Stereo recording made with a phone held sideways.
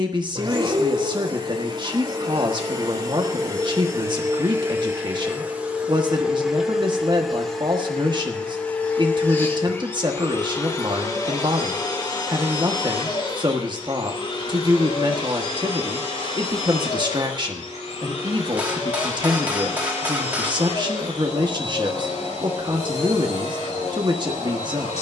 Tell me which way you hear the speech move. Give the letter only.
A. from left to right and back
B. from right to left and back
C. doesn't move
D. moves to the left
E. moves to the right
C.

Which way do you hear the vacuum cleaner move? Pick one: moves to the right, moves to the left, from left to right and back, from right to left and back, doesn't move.
moves to the left.